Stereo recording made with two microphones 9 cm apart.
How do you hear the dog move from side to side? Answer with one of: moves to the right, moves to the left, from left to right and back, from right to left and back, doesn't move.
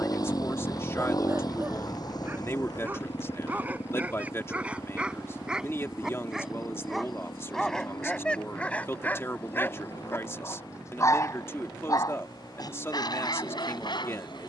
moves to the left.